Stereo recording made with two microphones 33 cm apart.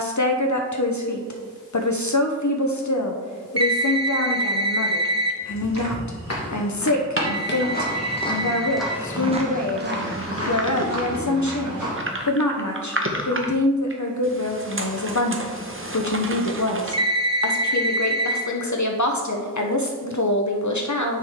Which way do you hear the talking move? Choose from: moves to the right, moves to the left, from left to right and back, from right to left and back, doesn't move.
doesn't move.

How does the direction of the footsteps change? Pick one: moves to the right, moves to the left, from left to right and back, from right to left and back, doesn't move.
moves to the right.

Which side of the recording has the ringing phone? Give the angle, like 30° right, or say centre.
50° right.